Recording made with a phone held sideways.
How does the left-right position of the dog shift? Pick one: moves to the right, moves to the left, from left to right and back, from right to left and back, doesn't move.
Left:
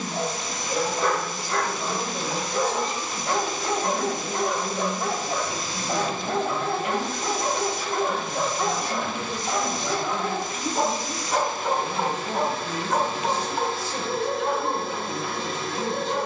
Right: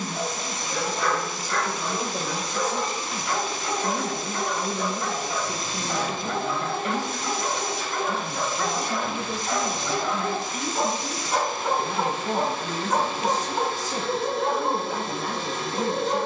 moves to the right.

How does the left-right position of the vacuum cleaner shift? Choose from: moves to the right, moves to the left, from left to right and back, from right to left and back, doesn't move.
doesn't move.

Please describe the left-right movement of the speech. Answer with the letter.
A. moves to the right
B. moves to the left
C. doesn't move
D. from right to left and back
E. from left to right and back
C.